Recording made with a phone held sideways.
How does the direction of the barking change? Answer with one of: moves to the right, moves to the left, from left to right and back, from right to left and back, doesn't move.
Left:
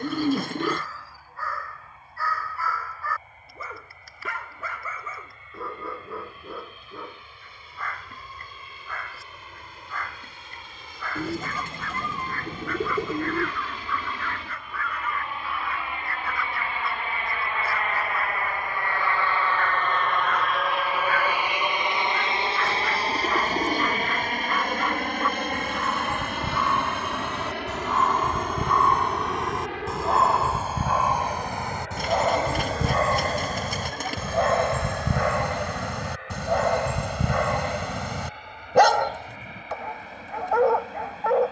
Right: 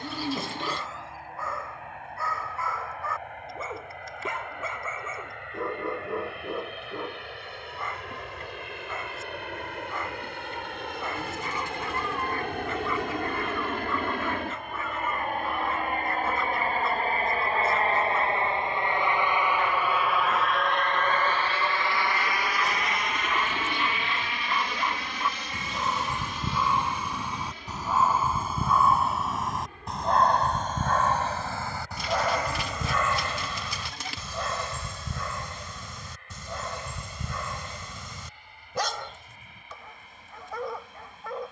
moves to the left.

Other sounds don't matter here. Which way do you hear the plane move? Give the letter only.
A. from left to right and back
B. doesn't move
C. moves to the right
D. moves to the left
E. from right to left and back
D.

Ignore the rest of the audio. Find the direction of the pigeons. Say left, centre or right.
left.